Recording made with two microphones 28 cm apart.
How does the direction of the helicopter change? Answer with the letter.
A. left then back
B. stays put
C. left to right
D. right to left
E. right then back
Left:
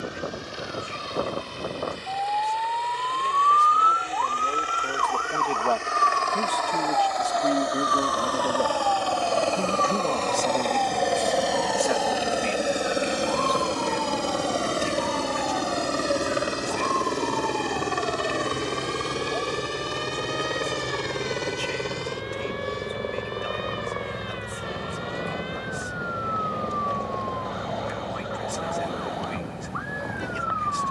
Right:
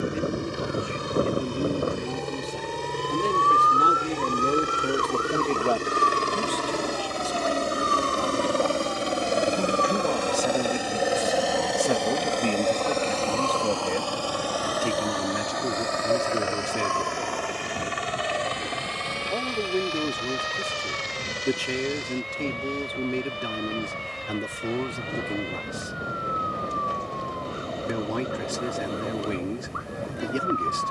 D.